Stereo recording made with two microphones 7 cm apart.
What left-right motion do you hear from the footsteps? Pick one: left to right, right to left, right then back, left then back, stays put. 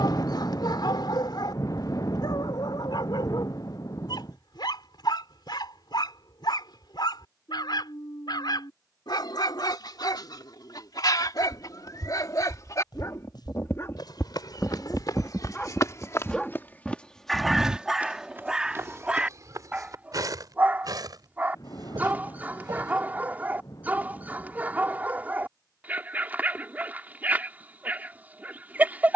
left to right.